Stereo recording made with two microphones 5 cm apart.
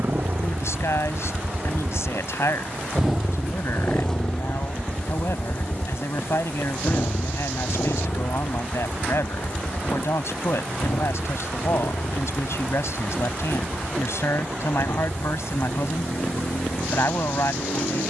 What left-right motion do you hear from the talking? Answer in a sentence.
You can hear the talking stay in one place.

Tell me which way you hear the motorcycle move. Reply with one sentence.
In this clip you hear the motorcycle move to the left.